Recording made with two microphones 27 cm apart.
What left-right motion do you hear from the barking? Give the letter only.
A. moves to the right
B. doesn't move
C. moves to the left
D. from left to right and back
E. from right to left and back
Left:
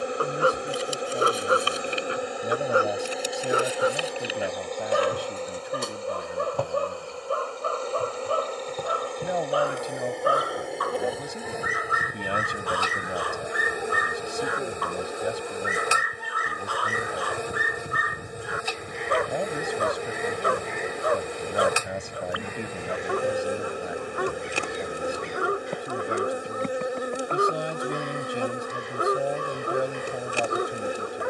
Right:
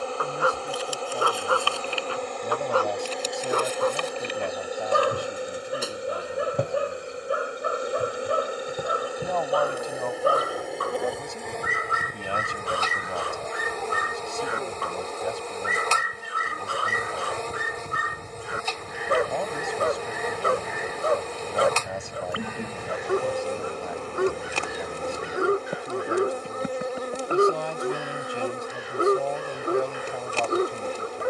A.